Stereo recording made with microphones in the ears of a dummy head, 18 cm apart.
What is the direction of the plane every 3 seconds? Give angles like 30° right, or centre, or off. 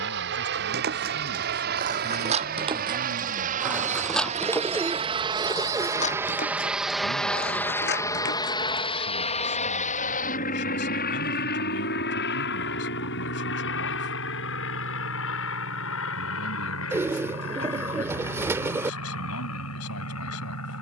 60° right, 30° right, 10° left, 40° left, 60° left, 60° left, 70° left.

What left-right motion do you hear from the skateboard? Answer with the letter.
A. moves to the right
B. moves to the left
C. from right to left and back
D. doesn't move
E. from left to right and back
B.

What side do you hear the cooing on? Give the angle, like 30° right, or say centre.
10° right.